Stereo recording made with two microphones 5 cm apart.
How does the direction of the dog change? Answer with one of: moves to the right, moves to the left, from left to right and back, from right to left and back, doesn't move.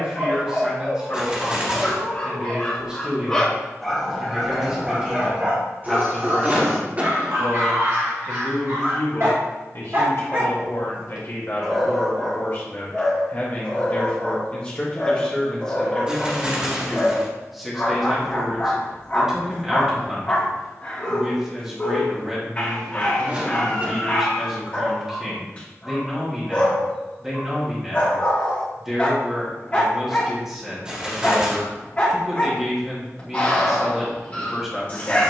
from left to right and back.